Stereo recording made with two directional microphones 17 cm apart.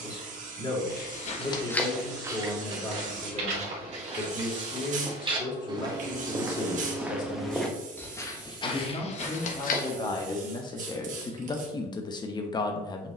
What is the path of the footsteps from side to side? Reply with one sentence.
You can hear the footsteps move from left to right and back again.